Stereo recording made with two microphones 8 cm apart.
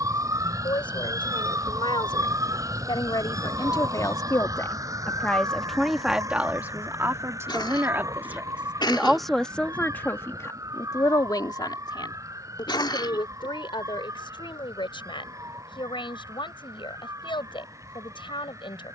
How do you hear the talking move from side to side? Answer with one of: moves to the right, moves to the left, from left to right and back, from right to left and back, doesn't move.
from left to right and back.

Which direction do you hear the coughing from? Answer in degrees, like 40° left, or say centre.
60° left.